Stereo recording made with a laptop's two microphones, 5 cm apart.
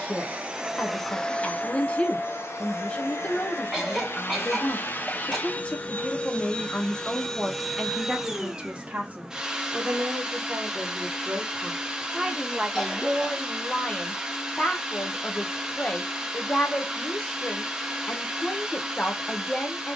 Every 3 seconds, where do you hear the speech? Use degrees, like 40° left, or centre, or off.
20° left, 20° left, centre, 40° right, 10° left, 20° left, 20° left.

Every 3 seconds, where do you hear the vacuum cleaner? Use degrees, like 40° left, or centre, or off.
20° left, 40° left, centre, 10° right, 10° right, 10° right, 10° right.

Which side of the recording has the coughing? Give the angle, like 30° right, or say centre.
centre.